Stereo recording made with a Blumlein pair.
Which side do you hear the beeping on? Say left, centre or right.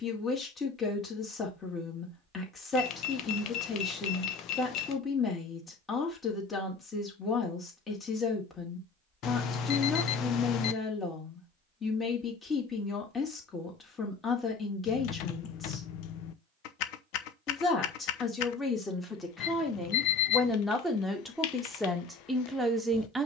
left.